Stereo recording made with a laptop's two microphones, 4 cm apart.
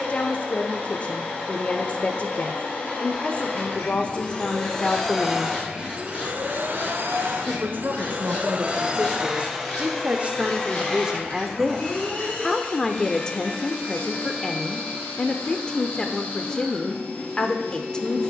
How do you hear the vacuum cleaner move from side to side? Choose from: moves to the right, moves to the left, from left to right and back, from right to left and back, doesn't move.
from left to right and back.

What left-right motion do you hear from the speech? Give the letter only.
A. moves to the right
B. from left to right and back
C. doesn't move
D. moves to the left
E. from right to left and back
B.